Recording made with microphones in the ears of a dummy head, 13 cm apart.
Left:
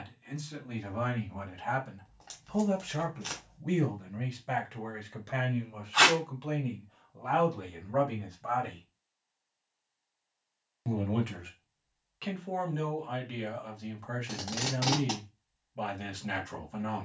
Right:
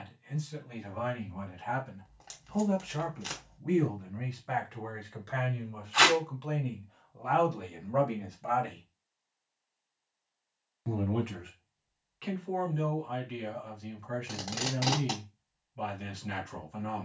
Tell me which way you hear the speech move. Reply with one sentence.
In this clip you hear the speech go right and come back.